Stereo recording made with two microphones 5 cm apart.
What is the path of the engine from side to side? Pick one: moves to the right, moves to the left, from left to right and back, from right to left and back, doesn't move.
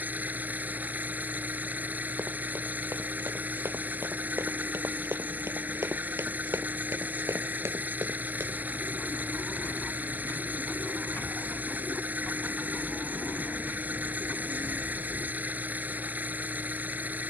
doesn't move.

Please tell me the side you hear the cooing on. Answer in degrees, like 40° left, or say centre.
50° left.